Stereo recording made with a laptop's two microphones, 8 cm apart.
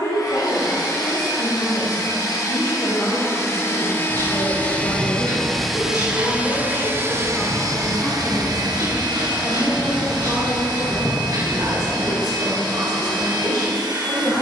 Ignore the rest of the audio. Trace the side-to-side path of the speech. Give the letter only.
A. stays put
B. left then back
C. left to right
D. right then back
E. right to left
C.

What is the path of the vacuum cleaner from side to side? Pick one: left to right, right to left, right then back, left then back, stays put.
left to right.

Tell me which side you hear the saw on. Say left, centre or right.
right.